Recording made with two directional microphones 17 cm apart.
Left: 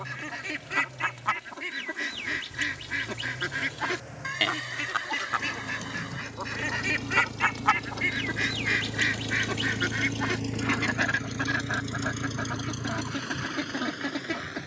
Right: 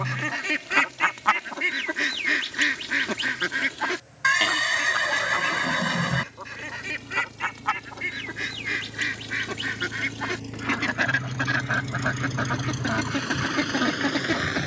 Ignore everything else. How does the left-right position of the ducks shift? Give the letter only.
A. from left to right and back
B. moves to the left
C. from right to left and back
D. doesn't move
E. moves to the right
C.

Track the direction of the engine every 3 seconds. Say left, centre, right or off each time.
left, left, left, left, right.